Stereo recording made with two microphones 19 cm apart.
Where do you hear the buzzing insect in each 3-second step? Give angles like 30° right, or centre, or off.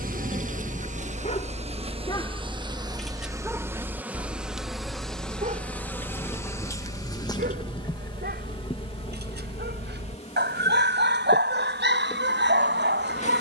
40° right, centre, 20° left, 40° left, 40° left.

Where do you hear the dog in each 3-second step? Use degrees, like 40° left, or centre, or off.
30° left, 30° right, 60° right, 70° right, 70° right.